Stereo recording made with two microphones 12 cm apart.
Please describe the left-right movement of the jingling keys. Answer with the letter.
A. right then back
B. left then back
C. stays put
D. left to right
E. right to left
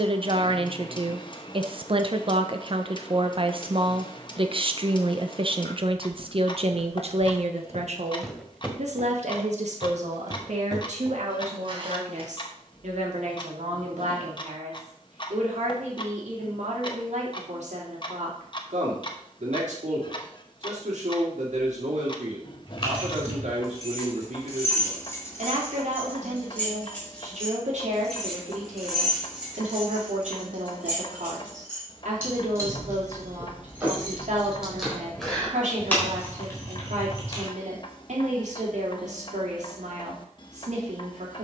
A.